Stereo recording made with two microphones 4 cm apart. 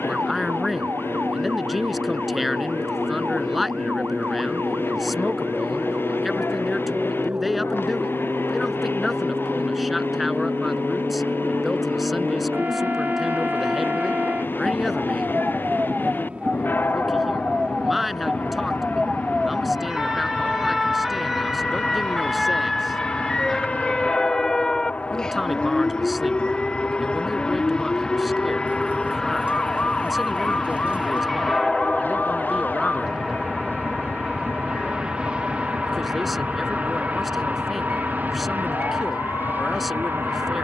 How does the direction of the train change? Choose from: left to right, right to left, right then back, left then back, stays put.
left to right.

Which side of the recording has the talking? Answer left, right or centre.
centre.